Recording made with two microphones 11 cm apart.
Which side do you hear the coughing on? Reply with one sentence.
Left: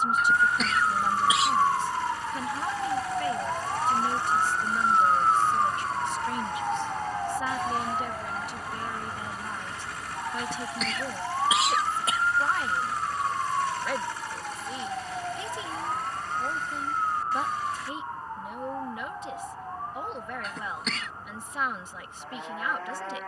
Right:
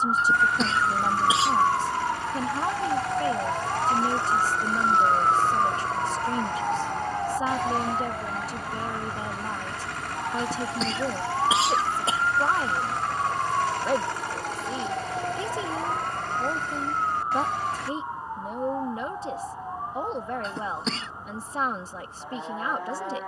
In this clip you hear the coughing on the right.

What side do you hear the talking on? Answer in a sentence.
In this clip you hear the talking on the right.